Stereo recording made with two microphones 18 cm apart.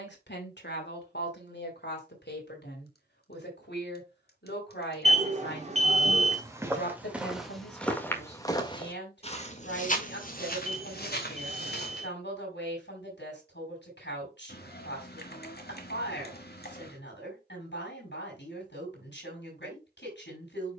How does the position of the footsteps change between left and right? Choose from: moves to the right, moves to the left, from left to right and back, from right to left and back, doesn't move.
moves to the left.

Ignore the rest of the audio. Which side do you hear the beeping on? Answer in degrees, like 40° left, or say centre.
40° right.